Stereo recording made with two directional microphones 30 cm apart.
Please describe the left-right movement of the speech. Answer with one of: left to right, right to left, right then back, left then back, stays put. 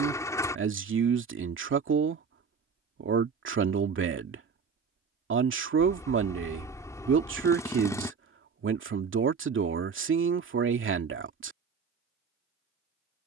stays put.